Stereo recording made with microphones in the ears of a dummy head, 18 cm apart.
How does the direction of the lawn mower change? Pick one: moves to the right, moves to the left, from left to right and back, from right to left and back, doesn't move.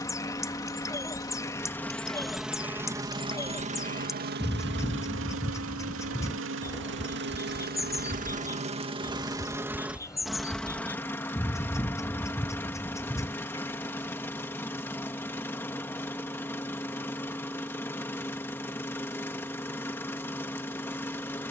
from left to right and back.